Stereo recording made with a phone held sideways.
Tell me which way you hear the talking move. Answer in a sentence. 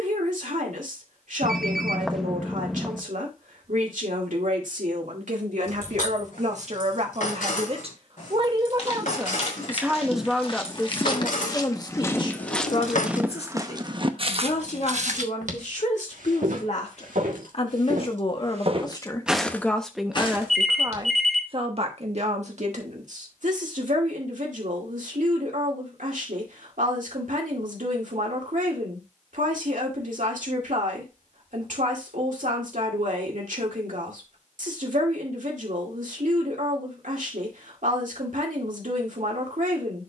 In this clip you hear the talking go left and come back.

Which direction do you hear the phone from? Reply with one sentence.
In this clip you hear the phone in the centre.